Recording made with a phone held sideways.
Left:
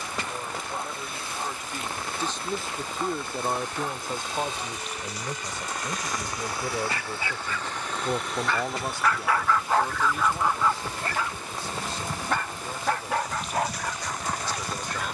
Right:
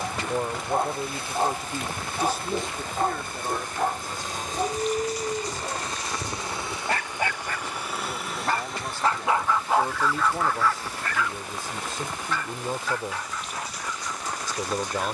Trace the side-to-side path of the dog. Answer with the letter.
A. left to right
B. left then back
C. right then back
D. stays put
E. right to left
E.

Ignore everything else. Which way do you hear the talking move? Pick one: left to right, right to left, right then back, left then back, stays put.
left then back.